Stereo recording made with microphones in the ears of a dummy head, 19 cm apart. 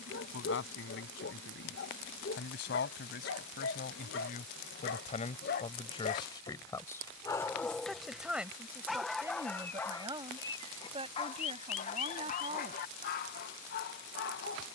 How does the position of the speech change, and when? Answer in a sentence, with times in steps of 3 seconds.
You can hear the speech on the left from 0 s, in the centre from 6 s and on the right from 9 s.